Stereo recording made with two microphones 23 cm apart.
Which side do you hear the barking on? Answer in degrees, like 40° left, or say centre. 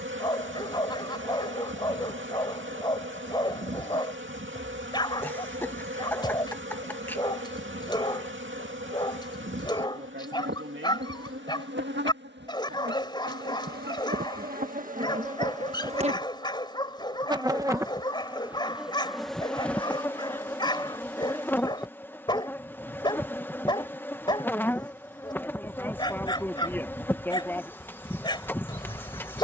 20° left.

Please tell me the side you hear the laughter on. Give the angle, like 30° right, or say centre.
10° left.